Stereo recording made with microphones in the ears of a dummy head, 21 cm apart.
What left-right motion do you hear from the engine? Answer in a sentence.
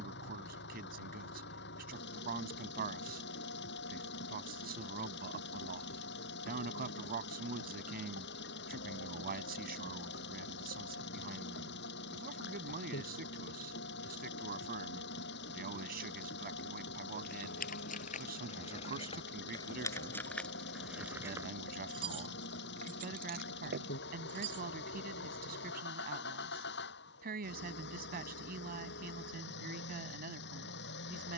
You can hear the engine stay in one place.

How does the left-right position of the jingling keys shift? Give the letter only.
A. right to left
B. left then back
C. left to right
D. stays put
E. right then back
C.